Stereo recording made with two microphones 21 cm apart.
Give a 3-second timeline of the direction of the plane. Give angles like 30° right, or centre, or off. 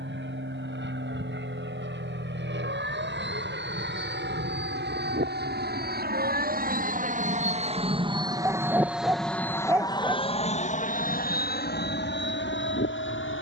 70° right, 60° right, 30° right, 30° left, 60° left.